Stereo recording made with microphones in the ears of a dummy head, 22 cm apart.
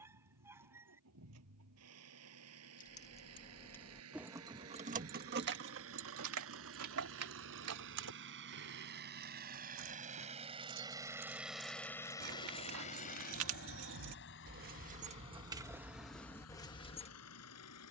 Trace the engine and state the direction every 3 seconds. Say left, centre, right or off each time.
right, right, right, right, left, left.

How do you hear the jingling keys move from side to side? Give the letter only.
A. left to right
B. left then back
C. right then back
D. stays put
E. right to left
C.